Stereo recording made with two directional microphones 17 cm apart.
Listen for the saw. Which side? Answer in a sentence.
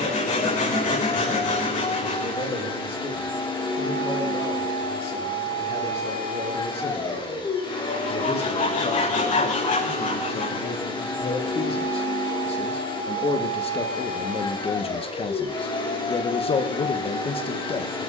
In this clip you hear the saw on the left.